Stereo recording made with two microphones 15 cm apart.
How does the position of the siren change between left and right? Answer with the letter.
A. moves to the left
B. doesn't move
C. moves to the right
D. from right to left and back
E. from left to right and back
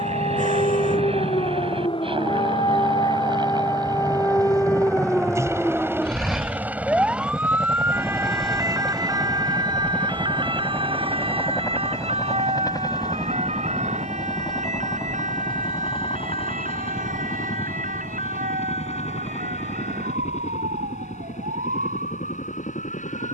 C.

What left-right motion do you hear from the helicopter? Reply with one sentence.
You can hear the helicopter travel towards the left.